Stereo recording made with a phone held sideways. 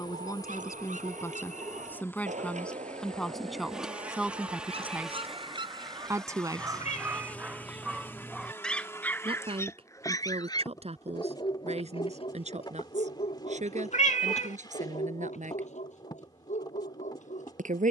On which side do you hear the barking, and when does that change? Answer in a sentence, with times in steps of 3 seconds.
In this clip you hear the barking on the right from 0 s, in the centre from 6 s and on the left from 9 s.